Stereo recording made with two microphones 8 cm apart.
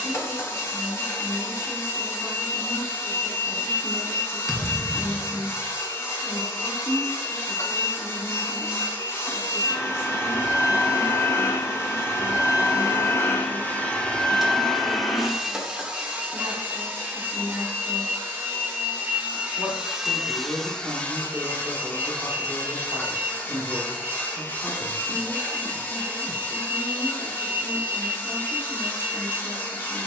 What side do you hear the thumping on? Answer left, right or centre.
centre.